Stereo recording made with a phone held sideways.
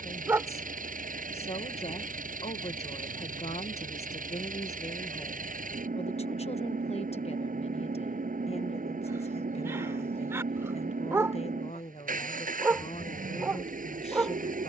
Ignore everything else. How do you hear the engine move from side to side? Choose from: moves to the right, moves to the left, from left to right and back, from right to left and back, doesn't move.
doesn't move.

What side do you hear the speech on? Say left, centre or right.
left.